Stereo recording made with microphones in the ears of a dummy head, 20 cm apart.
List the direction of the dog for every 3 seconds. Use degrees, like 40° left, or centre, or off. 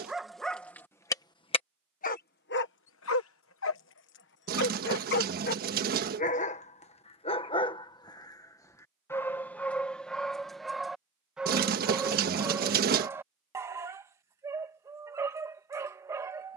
10° left, 50° left, 20° left, centre, 10° right, 10° right.